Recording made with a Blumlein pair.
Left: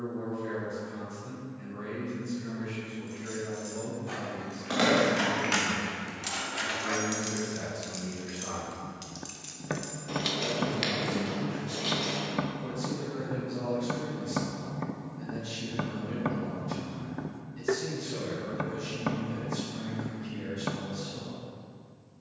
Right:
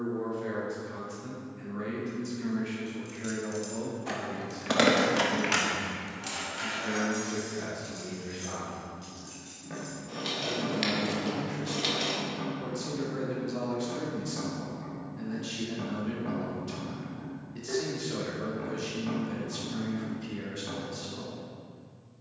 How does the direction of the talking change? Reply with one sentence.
You can hear the talking move from right to left and back again.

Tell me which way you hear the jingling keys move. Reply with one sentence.
In this clip you hear the jingling keys go left and come back.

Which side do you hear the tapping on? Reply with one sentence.
You can hear the tapping on the left.